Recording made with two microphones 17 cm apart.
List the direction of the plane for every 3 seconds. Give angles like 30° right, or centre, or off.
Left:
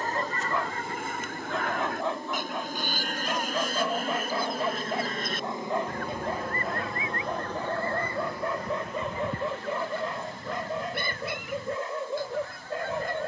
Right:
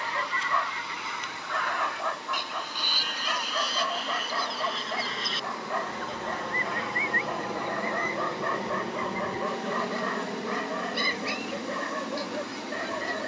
50° left, 30° left, 10° right, 50° right, 60° right.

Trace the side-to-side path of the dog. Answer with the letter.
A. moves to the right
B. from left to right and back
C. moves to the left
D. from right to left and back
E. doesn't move
E.